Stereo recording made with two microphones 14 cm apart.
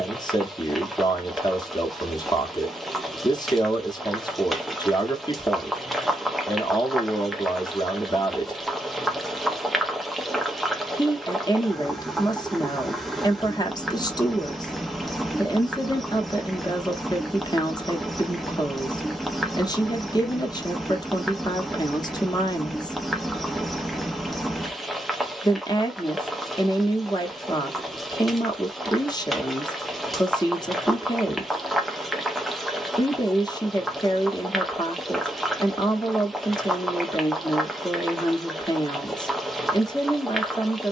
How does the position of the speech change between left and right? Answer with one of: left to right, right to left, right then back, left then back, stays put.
stays put.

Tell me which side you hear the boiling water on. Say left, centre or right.
centre.